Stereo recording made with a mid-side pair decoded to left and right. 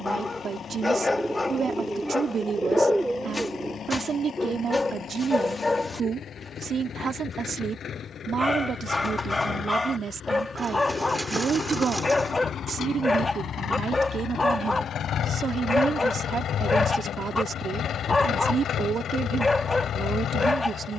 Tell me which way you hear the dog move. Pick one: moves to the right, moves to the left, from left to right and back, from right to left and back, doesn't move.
doesn't move.